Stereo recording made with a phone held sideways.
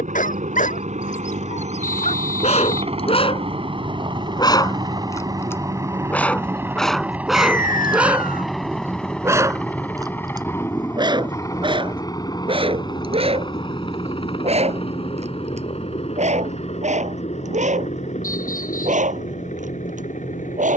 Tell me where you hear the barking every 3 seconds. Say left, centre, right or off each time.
left, left, centre, right, right, right, right.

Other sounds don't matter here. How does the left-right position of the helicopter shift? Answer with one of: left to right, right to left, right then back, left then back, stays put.
right to left.